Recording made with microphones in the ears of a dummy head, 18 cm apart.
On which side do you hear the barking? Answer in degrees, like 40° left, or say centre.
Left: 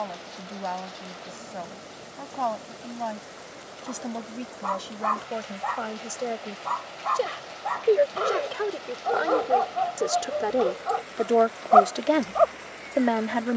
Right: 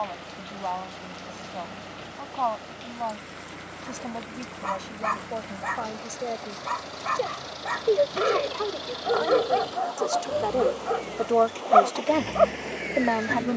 30° right.